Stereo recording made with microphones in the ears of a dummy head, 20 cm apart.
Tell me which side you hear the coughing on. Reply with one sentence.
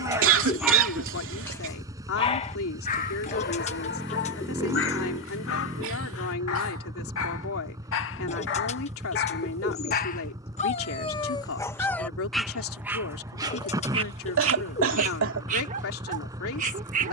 In this clip you hear the coughing on the right.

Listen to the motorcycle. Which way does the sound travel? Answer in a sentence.
In this clip you hear the motorcycle stay in one place.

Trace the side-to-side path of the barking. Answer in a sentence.
You can hear the barking move from right to left and back again.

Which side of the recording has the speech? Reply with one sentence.
In this clip you hear the speech on the left.